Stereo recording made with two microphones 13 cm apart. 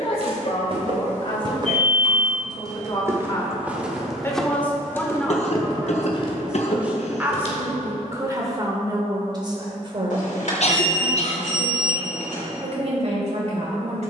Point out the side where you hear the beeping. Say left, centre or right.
left.